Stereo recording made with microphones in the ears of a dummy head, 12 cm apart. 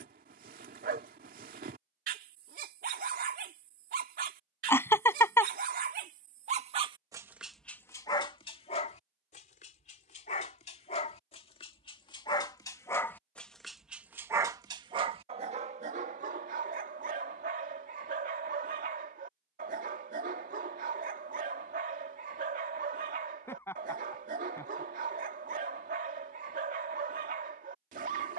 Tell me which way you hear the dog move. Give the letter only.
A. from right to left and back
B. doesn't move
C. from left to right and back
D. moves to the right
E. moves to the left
A.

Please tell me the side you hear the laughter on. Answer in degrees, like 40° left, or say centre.
20° left.